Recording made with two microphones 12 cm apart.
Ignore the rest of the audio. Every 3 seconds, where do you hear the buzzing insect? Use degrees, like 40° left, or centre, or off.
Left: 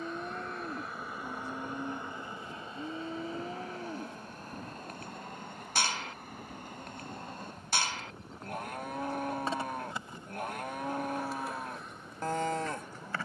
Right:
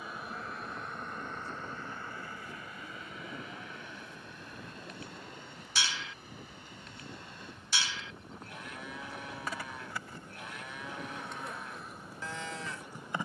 10° left, 40° left, 50° left, 10° left, 10° right.